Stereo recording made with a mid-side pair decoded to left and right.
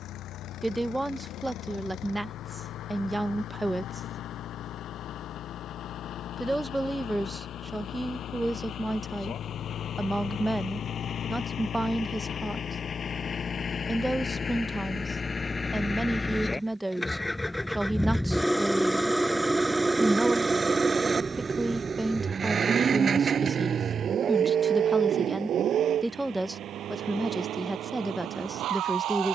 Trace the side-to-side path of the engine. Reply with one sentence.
In this clip you hear the engine travel towards the right.